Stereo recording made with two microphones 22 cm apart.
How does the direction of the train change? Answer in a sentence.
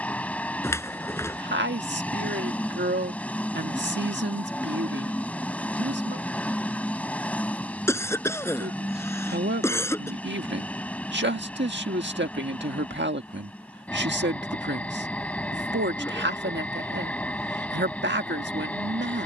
In this clip you hear the train stay in one place.